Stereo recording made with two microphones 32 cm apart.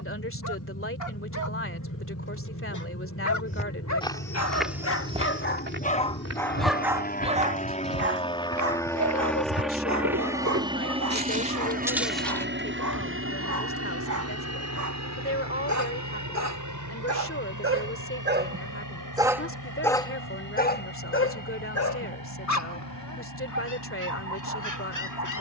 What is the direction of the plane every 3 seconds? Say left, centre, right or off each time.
left, left, left, centre, right, right, right, right, right.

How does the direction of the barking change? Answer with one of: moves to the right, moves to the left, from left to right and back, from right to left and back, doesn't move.
from left to right and back.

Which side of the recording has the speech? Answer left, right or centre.
left.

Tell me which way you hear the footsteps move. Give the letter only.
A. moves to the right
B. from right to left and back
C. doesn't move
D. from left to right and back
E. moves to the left
D.